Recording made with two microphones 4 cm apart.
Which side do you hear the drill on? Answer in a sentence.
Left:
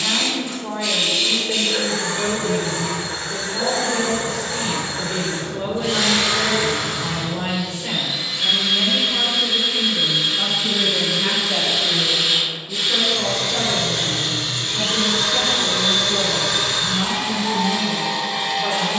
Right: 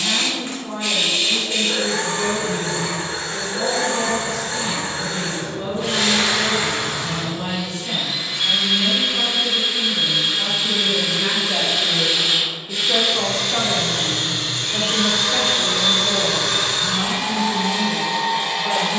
In this clip you hear the drill on the right.